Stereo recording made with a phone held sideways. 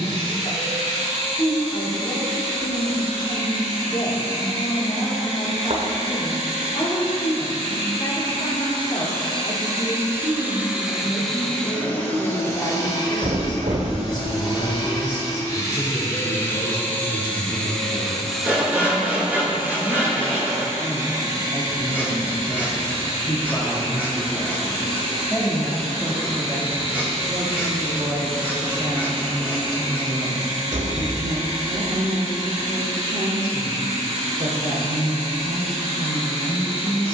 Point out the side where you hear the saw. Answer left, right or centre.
centre.